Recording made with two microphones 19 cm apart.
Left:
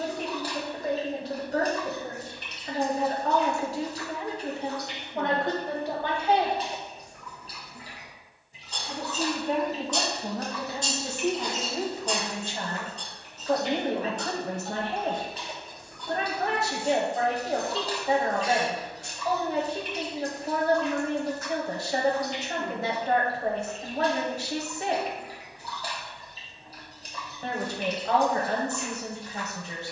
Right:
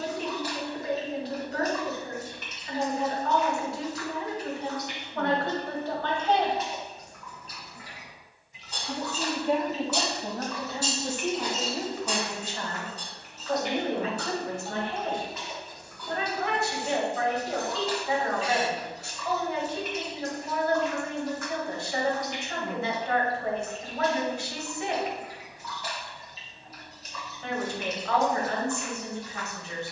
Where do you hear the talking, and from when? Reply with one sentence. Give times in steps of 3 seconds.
You can hear the talking on the left from 0 s, in the centre from 6 s and on the left from 12 s.